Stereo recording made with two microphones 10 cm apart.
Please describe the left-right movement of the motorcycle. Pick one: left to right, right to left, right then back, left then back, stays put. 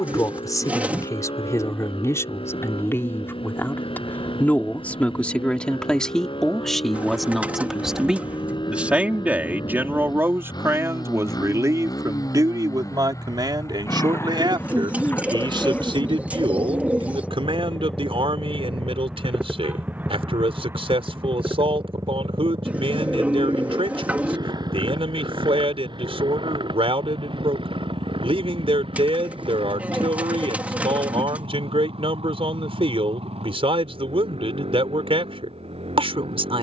left to right.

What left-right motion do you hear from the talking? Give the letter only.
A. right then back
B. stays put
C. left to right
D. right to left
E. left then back
C.